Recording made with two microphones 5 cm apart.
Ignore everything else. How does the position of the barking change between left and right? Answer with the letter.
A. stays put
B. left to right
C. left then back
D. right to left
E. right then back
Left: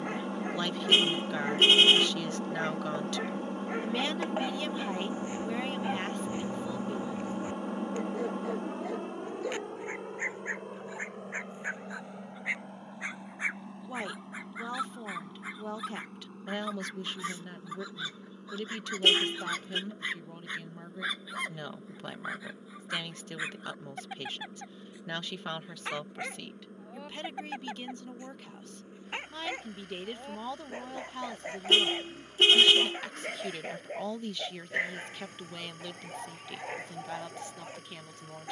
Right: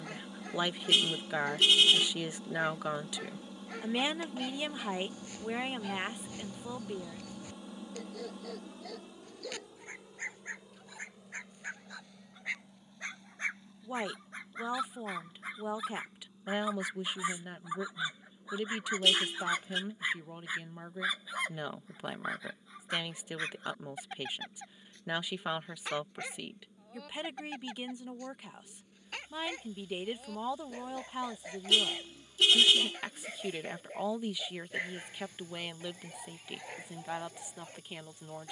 E.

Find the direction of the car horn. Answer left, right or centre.
left.